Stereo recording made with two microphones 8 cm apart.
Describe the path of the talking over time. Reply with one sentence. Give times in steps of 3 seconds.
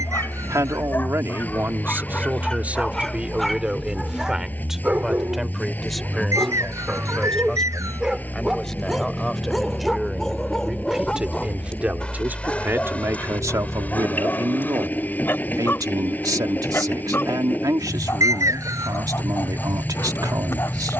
You can hear the talking on the right from 0 s, in the centre from 3 s and on the right from 12 s.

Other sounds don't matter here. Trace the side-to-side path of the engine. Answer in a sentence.
In this clip you hear the engine stay put.